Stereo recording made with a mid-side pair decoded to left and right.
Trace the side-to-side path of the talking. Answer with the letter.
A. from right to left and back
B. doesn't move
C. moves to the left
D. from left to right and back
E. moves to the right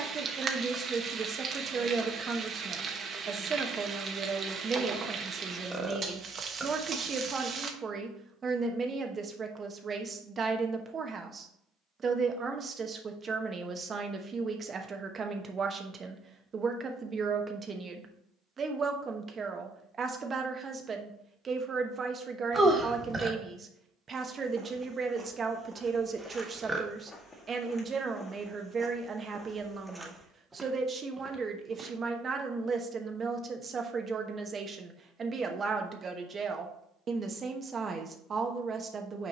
B.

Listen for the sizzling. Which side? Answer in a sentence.
In this clip you hear the sizzling on the right.